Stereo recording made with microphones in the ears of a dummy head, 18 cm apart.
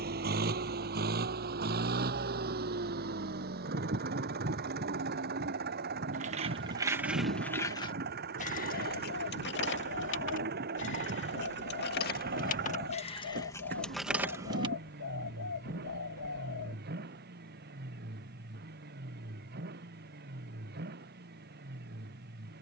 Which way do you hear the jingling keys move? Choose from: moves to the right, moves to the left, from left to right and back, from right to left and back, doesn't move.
from right to left and back.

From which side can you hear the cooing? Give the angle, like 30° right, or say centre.
80° left.